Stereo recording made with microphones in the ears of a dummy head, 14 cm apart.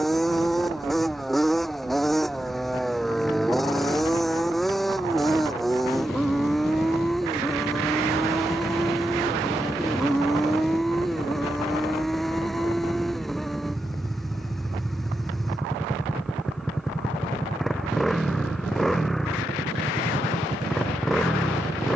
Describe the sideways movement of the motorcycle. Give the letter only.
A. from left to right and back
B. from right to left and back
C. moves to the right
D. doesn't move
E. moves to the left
D.